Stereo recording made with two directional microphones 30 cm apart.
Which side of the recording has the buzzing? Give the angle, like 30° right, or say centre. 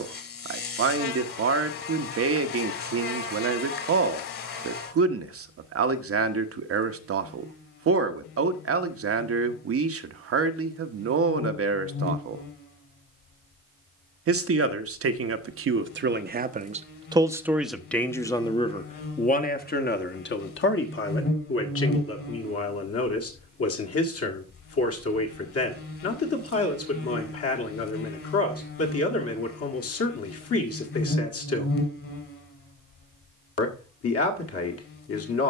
50° left.